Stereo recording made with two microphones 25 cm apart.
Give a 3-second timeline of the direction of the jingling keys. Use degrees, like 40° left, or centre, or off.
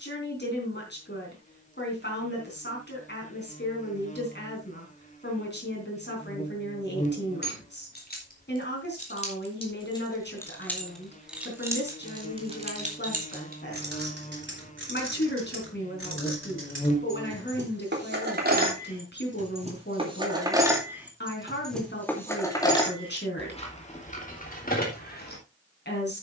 off, off, 40° left, 10° left, 40° right, 50° right, 30° right, 10° left, 30° left.